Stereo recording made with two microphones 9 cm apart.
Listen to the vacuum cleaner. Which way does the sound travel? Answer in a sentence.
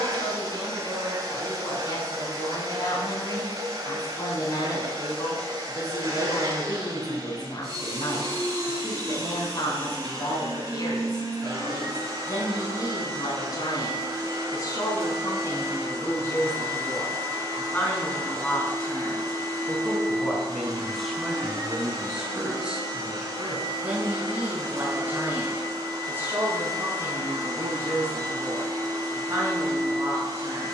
You can hear the vacuum cleaner stay put.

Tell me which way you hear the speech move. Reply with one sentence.
You can hear the speech move to the right.